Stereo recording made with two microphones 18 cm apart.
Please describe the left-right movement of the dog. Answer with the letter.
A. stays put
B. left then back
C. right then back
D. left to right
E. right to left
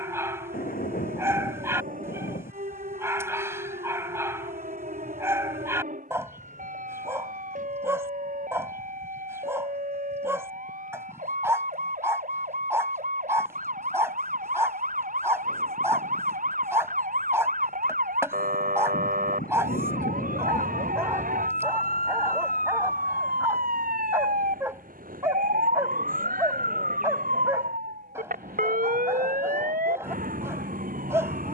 A.